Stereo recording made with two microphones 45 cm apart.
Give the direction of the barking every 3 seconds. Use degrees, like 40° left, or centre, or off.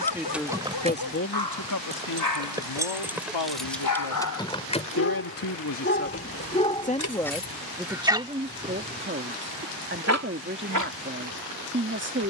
60° left, 40° left, centre, 40° right.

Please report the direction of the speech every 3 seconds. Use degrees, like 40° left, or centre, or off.
40° left, 60° left, centre, 30° right.